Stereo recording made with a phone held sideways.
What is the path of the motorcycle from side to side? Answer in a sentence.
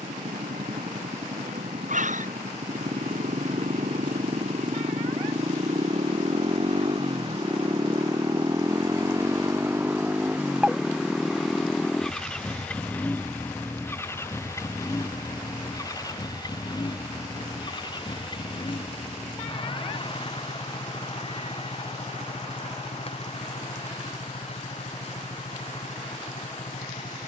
You can hear the motorcycle move from right to left.